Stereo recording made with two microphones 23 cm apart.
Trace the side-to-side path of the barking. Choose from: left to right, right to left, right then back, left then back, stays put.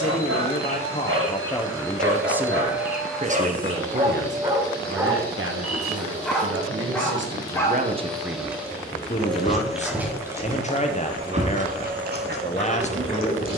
left then back.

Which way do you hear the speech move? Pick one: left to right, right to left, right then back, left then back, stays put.
right then back.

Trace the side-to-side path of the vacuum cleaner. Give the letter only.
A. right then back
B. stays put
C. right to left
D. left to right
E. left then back
E.